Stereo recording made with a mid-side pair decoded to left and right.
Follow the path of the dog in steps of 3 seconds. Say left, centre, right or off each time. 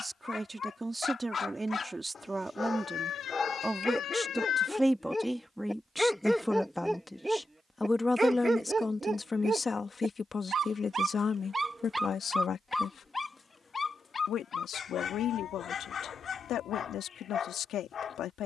left, left, centre, right, left, left.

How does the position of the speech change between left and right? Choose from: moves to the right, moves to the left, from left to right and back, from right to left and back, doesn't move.
moves to the left.